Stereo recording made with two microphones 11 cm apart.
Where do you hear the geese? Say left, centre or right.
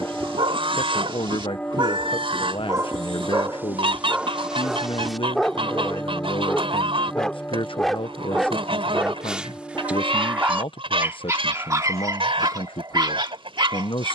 right.